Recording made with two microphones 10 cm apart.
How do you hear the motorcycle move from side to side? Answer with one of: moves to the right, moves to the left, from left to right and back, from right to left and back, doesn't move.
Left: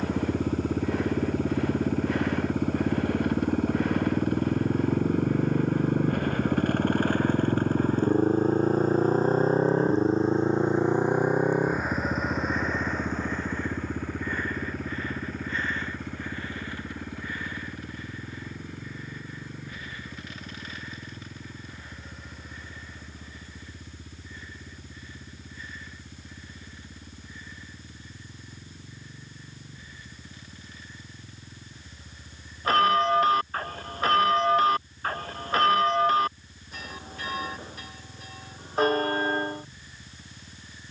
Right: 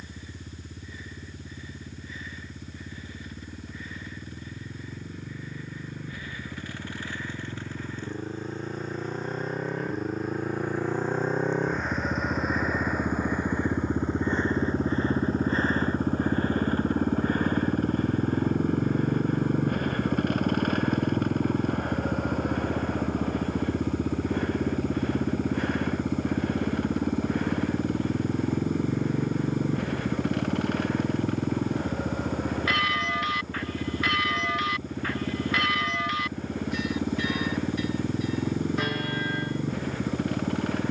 moves to the right.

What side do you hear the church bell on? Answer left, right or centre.
left.